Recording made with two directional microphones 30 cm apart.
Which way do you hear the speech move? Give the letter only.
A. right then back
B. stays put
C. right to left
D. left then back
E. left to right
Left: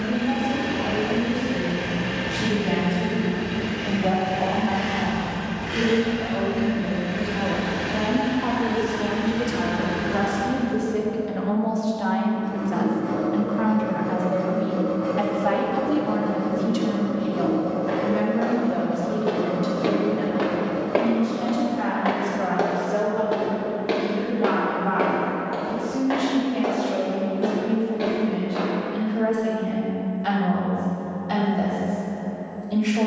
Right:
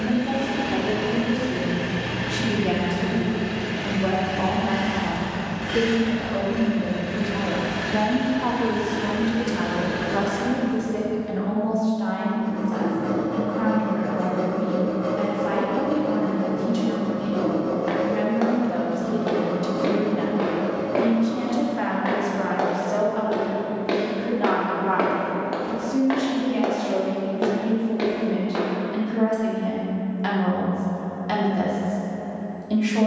D.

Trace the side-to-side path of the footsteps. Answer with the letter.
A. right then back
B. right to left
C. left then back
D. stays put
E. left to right
C.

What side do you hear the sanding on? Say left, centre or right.
right.